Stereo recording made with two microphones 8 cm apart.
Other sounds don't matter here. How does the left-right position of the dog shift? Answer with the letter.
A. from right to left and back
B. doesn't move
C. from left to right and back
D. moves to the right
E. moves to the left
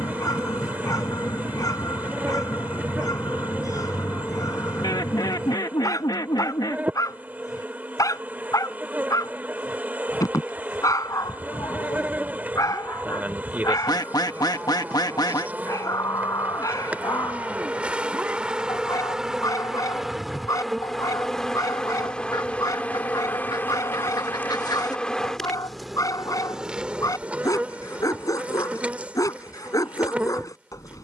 B.